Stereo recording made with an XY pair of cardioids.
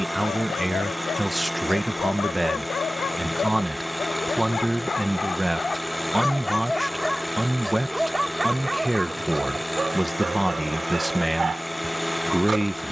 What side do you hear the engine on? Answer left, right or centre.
centre.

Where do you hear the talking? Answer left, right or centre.
centre.